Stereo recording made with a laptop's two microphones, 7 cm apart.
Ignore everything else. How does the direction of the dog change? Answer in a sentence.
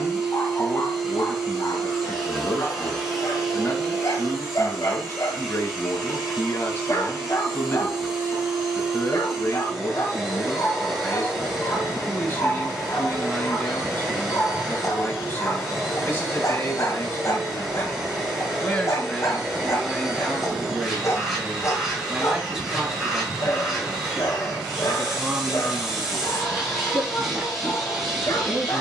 In this clip you hear the dog stay put.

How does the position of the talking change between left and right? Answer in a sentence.
In this clip you hear the talking move to the right.